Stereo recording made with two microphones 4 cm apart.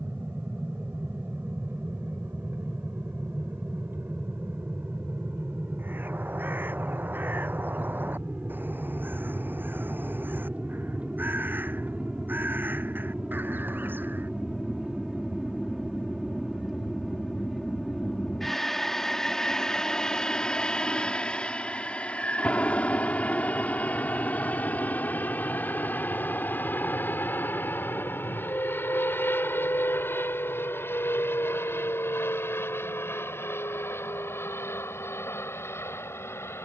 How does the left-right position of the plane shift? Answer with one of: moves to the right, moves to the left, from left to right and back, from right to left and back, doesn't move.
moves to the left.